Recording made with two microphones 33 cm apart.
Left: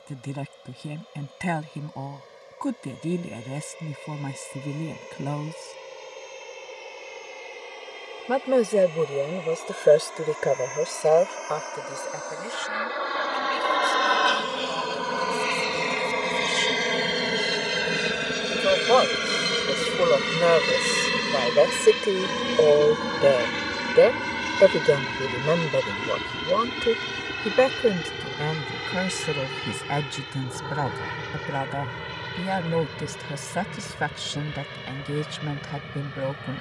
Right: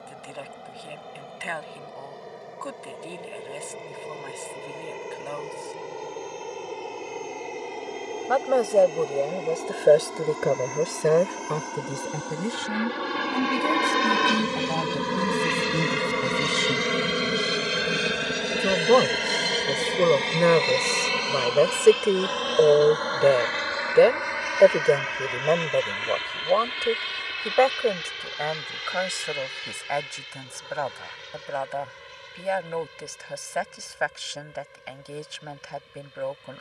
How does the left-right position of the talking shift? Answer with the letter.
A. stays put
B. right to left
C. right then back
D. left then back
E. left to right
C.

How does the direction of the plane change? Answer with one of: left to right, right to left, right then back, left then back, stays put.
right to left.